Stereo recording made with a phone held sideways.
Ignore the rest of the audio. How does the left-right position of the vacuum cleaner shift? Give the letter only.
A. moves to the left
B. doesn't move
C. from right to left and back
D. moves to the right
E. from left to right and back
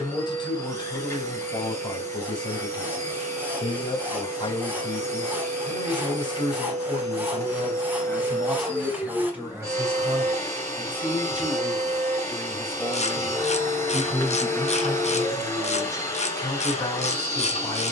B.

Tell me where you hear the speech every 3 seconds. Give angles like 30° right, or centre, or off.
40° left, 40° left, 20° left, 10° right, centre, 30° left.